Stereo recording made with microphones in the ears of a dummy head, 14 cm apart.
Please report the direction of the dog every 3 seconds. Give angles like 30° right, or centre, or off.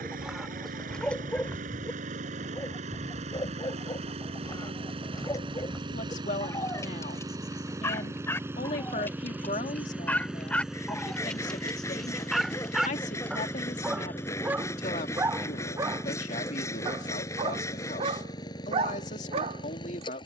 10° left, 20° left, 20° left, 10° left, 10° right, 30° right, 40° right.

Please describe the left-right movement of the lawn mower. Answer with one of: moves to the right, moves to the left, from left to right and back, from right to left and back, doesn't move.
moves to the left.